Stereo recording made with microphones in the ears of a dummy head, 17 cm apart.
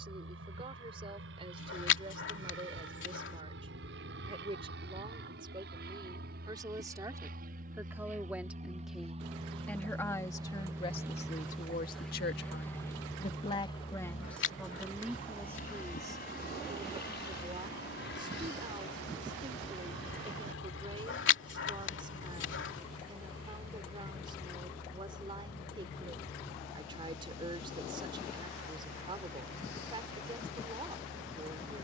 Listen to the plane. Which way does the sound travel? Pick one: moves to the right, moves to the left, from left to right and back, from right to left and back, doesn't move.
moves to the left.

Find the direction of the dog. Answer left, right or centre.
left.